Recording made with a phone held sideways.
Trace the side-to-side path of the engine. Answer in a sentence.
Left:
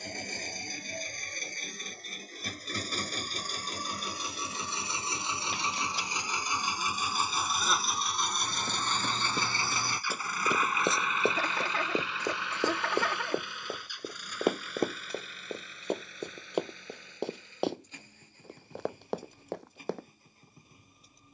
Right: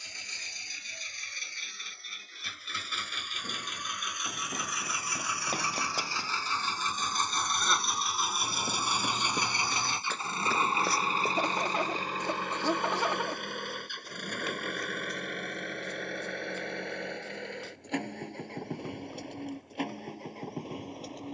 You can hear the engine travel towards the right.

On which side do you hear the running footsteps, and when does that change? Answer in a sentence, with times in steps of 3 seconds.
You can hear the running footsteps not at all from 0 s, on the right from 3 s, in the centre from 9 s and on the left from 12 s.